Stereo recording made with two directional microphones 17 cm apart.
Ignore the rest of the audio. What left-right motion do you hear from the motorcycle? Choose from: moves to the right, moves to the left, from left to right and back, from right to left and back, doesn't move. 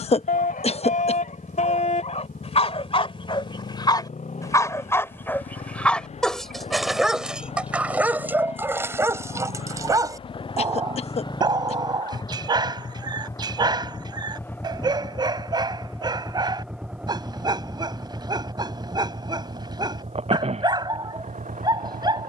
moves to the right.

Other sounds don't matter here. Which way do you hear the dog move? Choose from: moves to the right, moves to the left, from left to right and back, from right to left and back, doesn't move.
moves to the right.